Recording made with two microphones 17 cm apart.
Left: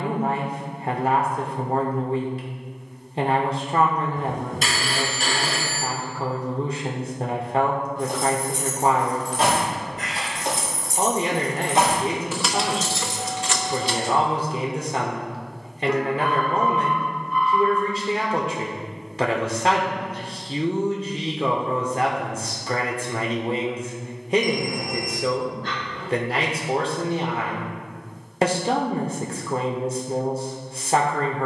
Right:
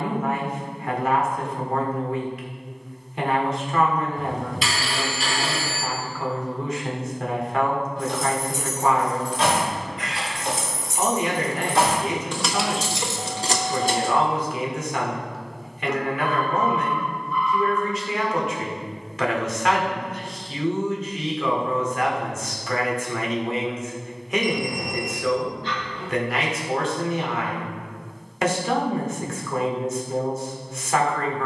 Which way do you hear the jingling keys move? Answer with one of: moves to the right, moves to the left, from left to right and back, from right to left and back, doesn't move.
moves to the right.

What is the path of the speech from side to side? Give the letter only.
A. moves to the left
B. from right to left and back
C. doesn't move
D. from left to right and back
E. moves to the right
C.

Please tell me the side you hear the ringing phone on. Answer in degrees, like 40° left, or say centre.
50° left.